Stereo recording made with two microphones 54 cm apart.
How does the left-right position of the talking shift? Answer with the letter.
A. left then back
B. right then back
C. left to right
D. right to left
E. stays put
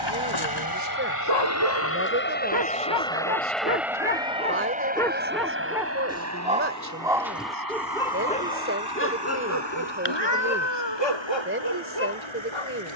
E.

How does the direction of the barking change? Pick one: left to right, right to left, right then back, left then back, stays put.
right then back.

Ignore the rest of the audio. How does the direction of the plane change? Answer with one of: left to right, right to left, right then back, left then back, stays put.
left to right.